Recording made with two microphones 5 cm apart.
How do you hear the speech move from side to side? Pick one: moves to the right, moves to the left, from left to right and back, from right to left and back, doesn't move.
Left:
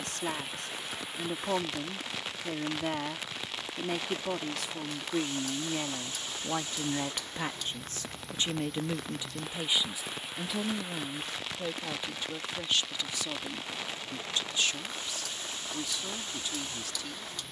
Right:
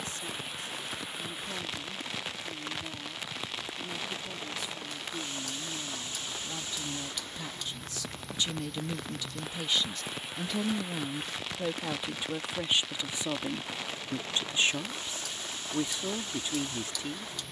moves to the right.